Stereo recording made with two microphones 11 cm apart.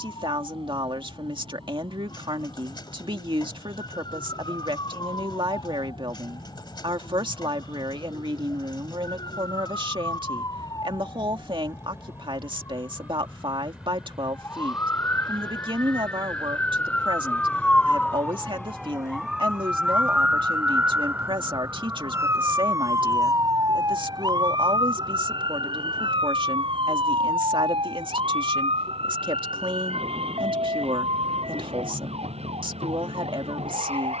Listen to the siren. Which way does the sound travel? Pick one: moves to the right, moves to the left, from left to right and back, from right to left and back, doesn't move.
moves to the right.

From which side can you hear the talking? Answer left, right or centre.
right.